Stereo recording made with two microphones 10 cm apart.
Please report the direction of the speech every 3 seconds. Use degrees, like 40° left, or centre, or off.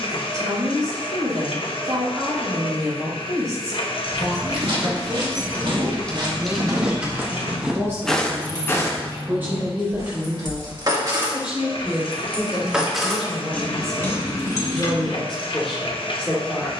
30° right, 30° right, 30° right, 20° right, centre, 10° left.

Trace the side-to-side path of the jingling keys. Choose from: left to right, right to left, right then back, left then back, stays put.
right then back.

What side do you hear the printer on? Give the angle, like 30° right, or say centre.
60° left.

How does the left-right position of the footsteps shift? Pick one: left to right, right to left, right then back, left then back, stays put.
right to left.